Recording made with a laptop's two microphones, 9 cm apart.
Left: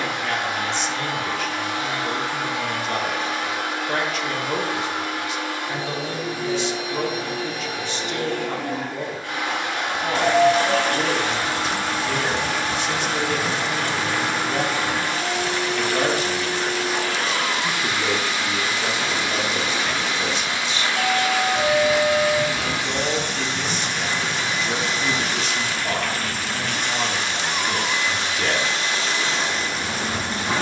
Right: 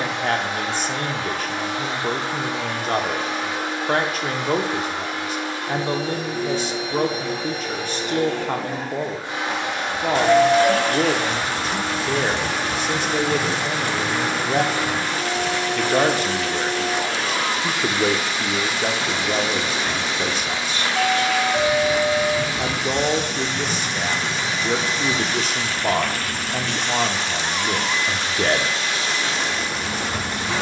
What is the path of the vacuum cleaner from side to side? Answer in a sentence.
In this clip you hear the vacuum cleaner move to the left.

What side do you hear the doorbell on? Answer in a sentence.
In this clip you hear the doorbell on the right.